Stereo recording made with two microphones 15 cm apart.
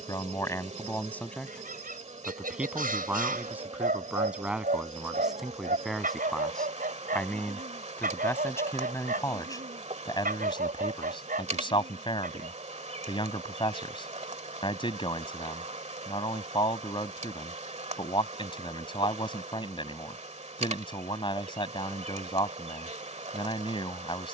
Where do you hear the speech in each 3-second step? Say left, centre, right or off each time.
centre, centre, centre, left, left, left, left, left.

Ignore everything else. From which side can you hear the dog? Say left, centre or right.
right.